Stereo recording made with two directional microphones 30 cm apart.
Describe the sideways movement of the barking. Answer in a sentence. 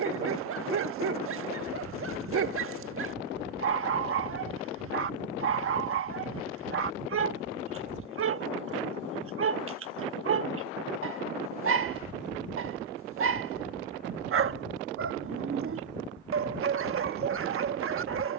You can hear the barking stay in one place.